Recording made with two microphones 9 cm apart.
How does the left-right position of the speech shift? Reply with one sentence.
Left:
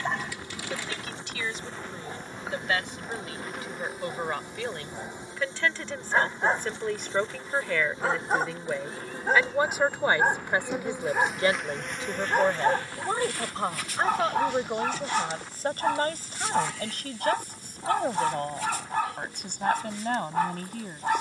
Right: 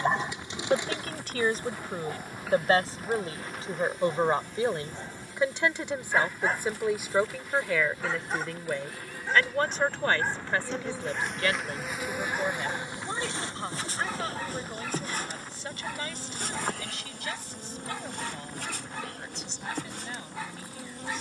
You can hear the speech travel towards the left.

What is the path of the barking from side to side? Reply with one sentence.
You can hear the barking move to the left.